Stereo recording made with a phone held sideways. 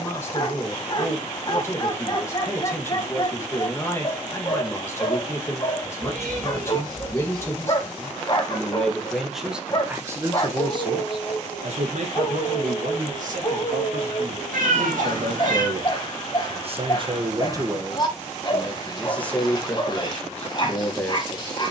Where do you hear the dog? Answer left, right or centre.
left.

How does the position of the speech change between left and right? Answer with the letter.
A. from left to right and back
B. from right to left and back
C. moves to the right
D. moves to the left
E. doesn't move
A.